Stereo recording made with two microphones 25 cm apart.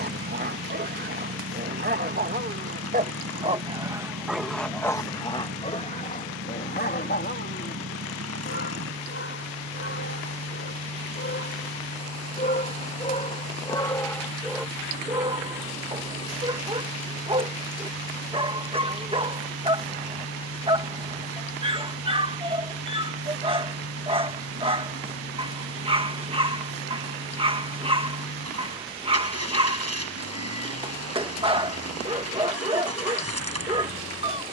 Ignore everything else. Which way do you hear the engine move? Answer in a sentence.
You can hear the engine stay put.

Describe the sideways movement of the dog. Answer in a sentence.
You can hear the dog move from right to left and back again.